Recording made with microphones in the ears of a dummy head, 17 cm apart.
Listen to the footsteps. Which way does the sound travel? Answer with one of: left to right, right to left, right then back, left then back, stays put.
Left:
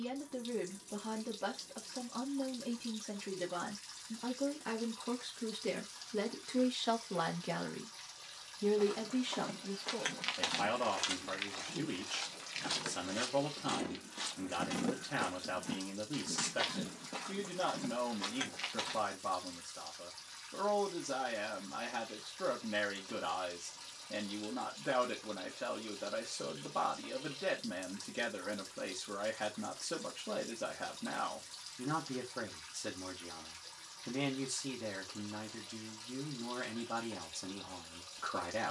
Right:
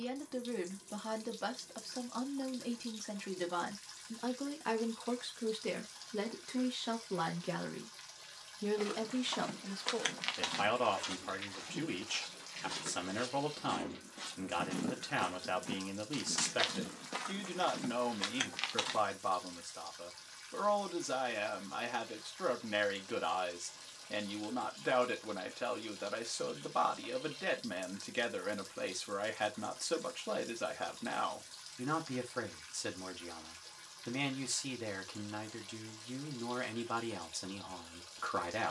left then back.